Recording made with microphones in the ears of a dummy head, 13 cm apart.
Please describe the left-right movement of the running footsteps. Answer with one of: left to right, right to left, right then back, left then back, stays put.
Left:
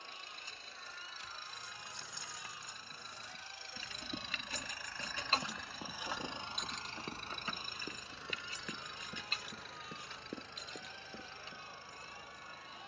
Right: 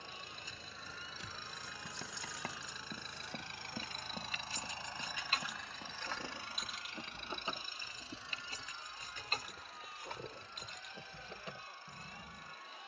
right to left.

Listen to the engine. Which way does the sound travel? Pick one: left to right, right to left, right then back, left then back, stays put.
right to left.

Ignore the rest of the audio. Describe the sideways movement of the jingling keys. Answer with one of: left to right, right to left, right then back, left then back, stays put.
left to right.